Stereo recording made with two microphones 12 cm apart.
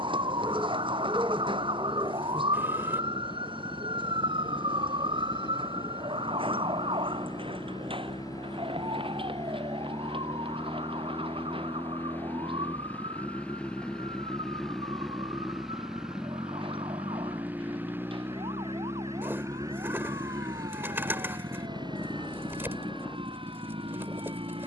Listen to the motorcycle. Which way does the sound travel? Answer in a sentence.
In this clip you hear the motorcycle travel towards the right.